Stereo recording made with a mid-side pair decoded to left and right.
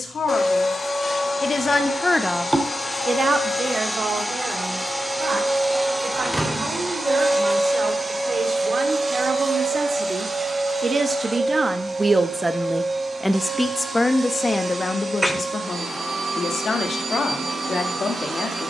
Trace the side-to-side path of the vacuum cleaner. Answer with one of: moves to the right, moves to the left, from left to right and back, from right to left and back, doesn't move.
moves to the right.